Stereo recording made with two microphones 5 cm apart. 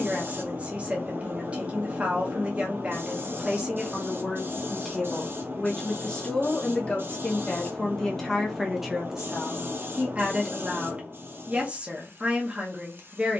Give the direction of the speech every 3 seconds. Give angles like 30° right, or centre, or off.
30° right, 10° right, 10° left, 30° right, 30° right.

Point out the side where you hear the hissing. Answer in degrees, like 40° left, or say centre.
60° right.